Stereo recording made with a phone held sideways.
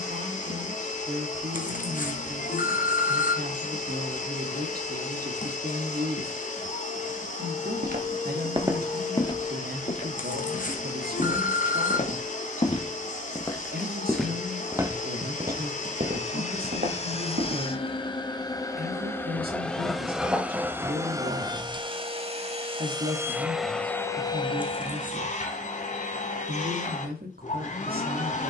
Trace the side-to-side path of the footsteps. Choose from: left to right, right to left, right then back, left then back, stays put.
left then back.